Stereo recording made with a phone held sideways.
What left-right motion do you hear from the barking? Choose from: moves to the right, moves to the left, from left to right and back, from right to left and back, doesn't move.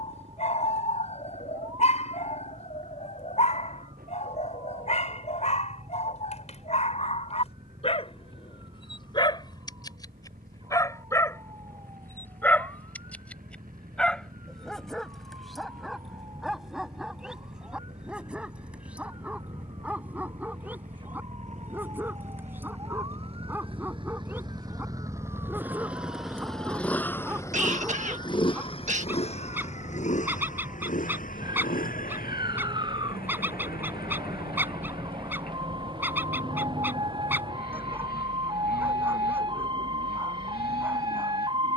moves to the right.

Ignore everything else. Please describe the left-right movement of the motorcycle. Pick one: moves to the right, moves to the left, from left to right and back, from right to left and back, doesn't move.
moves to the left.